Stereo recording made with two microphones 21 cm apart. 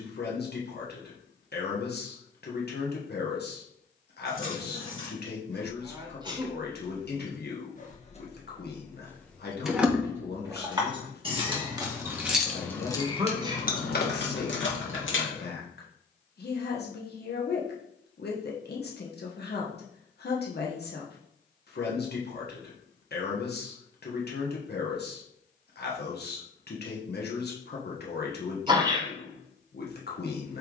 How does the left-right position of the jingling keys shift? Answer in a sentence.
You can hear the jingling keys go right and come back.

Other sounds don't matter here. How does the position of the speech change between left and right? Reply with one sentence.
You can hear the speech stay in one place.